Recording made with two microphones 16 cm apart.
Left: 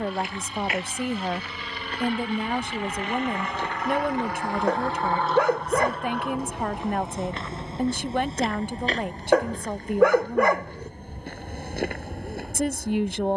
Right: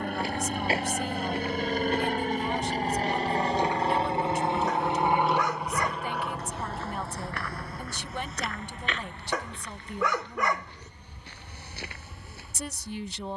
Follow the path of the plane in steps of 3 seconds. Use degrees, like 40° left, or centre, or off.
50° right, 20° right, 10° left, 40° left, 50° left.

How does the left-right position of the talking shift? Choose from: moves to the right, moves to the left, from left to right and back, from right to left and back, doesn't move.
doesn't move.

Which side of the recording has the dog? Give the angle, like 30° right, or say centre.
60° left.